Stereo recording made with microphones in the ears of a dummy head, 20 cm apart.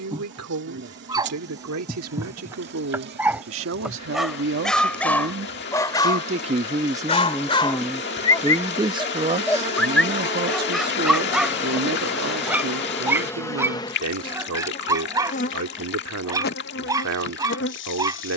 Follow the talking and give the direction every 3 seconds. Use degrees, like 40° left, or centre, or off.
70° right, 60° right, 10° right, 40° right, 70° right, 70° right.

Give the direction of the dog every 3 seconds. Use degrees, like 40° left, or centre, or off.
10° right, centre, 20° left, centre, 10° right, 10° right.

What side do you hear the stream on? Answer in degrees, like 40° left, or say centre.
50° left.